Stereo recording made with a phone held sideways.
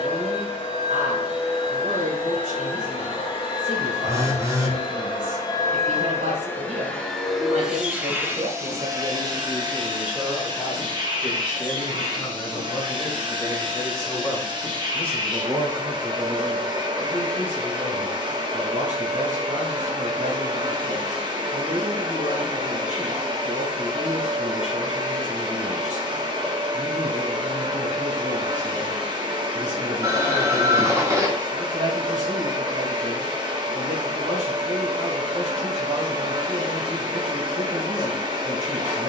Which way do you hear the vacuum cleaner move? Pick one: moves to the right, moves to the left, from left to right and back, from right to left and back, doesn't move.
moves to the right.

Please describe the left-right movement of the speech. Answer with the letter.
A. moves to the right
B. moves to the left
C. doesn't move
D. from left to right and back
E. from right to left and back
E.